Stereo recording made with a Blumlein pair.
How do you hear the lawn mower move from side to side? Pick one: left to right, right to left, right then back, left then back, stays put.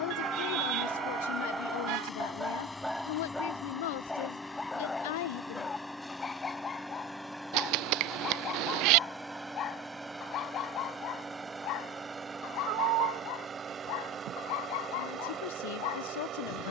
left to right.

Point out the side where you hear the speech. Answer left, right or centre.
left.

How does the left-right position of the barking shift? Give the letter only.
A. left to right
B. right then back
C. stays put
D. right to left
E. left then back
D.